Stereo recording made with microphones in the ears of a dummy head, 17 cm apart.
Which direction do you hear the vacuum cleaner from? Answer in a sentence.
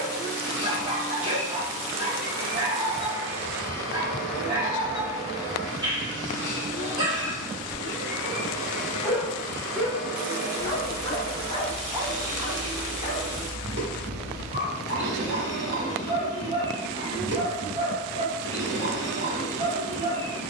You can hear the vacuum cleaner on the right.